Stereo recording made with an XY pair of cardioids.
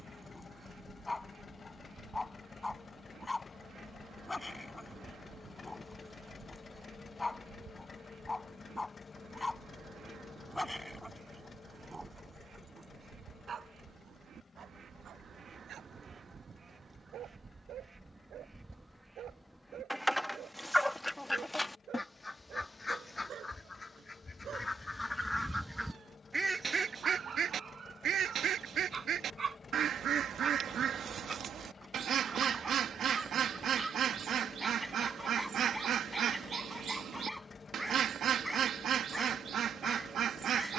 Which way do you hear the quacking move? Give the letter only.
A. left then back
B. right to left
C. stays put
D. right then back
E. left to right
A.